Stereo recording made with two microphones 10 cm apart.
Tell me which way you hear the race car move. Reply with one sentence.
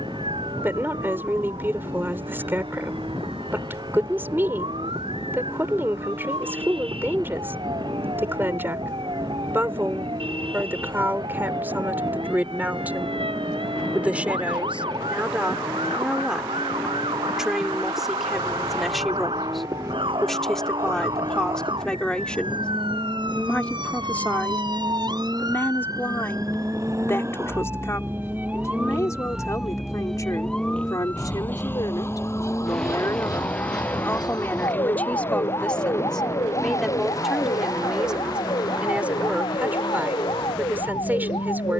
You can hear the race car move from right to left.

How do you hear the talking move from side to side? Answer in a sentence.
In this clip you hear the talking go left and come back.